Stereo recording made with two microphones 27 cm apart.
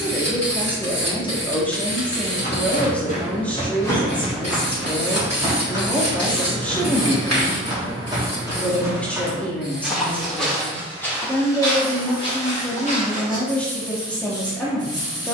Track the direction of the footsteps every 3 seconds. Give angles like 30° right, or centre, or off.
40° left, centre, 20° right, centre, 20° left.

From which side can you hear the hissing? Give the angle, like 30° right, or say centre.
70° left.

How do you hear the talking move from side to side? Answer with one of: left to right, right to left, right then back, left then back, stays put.
stays put.